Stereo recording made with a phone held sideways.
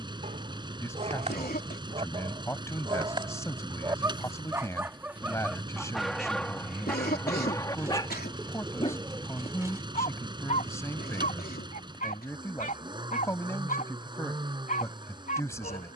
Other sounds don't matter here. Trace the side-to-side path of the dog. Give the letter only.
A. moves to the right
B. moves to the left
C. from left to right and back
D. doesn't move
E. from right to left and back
B.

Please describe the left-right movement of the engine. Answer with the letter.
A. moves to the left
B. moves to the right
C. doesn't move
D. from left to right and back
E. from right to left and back
C.